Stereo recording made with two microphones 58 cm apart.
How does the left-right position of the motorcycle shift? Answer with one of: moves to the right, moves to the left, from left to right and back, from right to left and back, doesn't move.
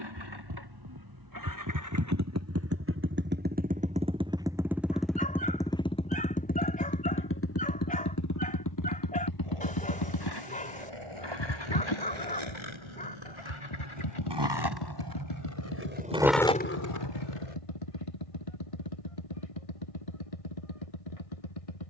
moves to the left.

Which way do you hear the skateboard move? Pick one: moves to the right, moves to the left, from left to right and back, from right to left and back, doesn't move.
moves to the left.